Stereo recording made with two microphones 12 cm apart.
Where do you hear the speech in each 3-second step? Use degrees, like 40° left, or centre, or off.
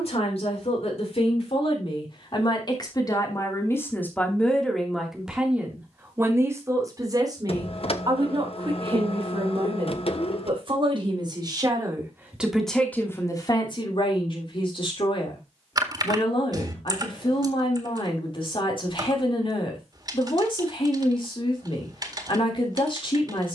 50° left, 10° left, 30° right, 40° right, 30° left, 50° left, 50° left, 50° left.